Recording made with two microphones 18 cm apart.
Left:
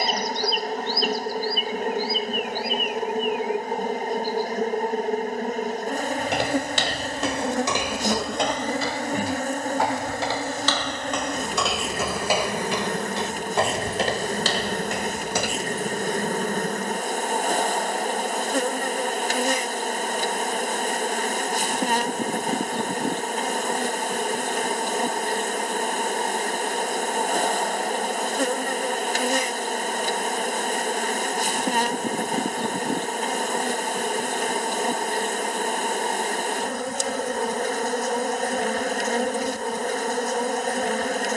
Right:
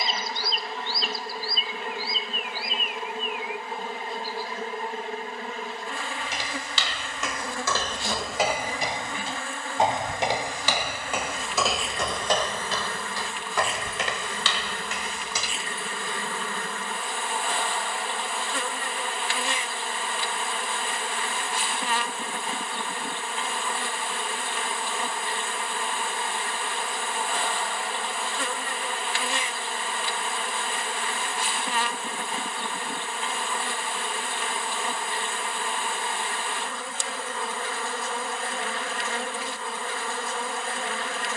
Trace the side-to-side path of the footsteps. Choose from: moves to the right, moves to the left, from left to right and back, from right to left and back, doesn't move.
from left to right and back.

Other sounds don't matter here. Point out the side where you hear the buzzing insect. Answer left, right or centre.
left.